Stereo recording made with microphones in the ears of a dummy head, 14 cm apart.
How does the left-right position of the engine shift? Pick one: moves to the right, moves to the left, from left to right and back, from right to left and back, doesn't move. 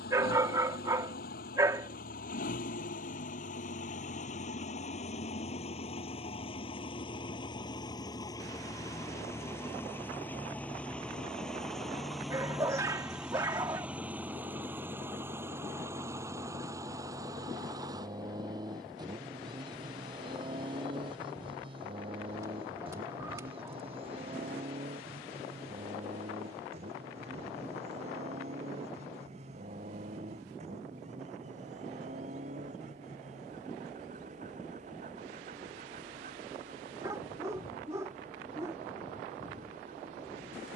moves to the right.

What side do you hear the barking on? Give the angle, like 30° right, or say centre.
20° right.